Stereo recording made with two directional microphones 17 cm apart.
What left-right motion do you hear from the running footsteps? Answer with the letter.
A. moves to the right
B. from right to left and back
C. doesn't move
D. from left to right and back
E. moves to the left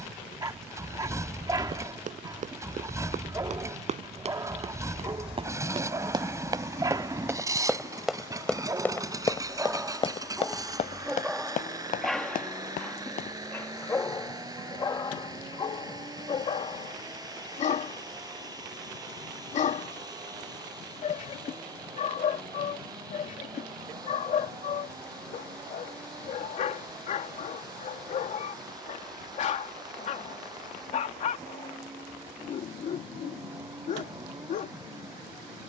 E.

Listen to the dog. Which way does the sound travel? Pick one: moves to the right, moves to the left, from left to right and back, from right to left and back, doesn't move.
moves to the left.